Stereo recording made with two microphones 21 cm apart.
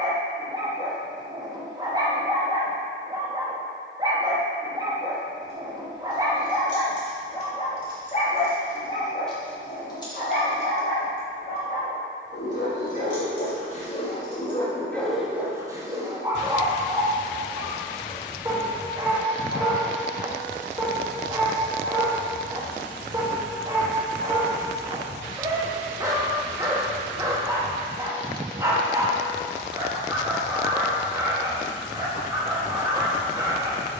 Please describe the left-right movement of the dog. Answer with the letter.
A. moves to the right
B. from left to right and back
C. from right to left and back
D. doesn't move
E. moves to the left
C.